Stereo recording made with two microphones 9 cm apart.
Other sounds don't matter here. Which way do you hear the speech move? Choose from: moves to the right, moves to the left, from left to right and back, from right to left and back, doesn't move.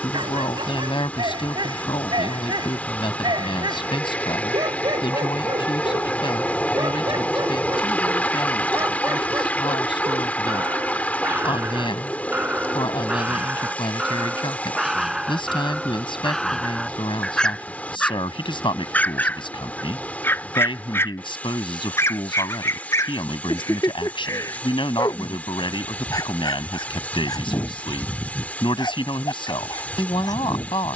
doesn't move.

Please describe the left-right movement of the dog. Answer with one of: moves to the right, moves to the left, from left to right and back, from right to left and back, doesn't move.
moves to the left.